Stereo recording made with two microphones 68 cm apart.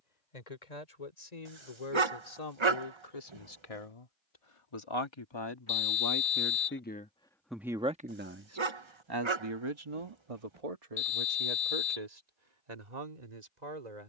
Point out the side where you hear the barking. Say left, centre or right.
right.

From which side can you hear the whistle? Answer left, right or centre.
left.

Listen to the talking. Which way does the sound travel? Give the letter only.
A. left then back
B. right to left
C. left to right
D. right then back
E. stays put
C.